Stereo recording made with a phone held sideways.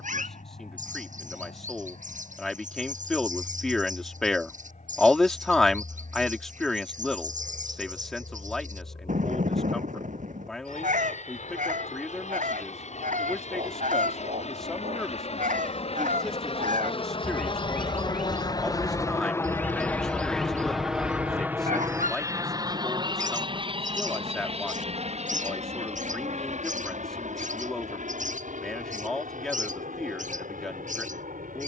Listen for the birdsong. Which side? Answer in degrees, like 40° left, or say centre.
70° right.